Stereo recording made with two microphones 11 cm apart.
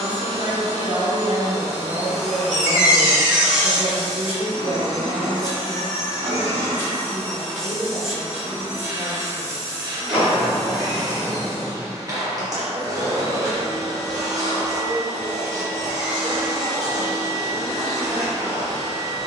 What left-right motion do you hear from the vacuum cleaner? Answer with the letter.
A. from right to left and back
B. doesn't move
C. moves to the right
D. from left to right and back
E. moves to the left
A.